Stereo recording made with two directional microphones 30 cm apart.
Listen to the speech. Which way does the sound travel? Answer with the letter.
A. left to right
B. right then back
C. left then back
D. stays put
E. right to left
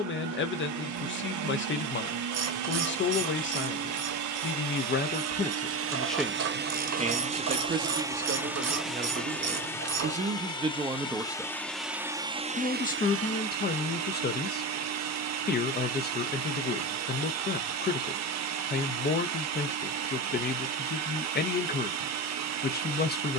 B.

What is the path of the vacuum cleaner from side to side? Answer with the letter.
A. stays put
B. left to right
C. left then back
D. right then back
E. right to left
C.